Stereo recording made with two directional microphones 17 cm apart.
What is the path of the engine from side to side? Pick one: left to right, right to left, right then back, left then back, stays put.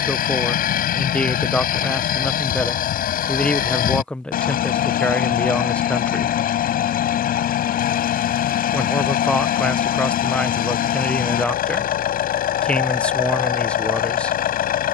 stays put.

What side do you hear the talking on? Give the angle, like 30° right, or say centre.
10° left.